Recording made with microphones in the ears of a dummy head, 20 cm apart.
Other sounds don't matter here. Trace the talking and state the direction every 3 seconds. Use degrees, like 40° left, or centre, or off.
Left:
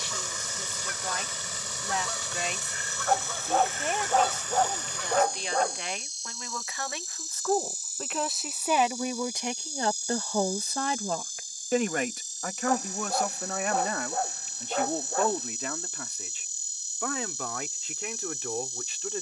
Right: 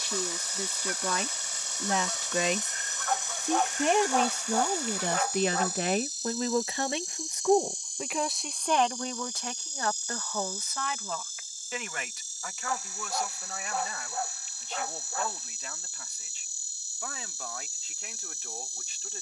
70° right, 50° right, 10° right, 30° left, 50° left, 60° left, 60° left.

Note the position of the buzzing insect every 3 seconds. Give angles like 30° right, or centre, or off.
20° right, 10° right, centre, 10° left, 20° left, 20° left, 20° left.